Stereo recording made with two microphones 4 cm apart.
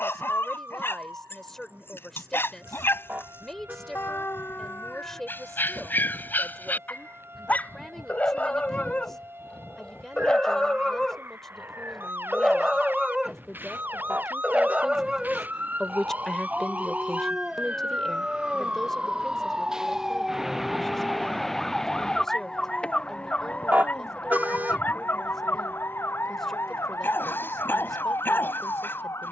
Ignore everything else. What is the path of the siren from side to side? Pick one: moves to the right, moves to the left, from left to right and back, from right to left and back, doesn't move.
moves to the left.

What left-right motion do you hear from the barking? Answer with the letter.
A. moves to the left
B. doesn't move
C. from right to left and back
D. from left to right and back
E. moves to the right
D.